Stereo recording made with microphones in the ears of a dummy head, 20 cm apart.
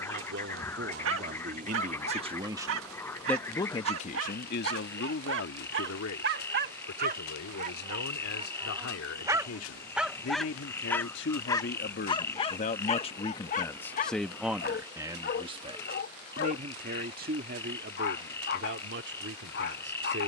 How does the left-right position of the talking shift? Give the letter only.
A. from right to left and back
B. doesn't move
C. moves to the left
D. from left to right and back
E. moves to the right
A.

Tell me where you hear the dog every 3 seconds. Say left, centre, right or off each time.
right, right, right, centre, left, left, left.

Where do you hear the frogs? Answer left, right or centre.
centre.